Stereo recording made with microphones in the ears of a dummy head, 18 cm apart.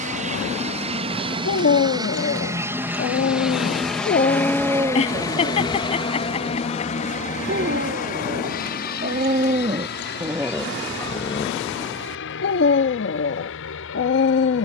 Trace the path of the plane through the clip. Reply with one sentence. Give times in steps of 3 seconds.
In this clip you hear the plane on the right from 0 s, in the centre from 3 s and on the left from 6 s.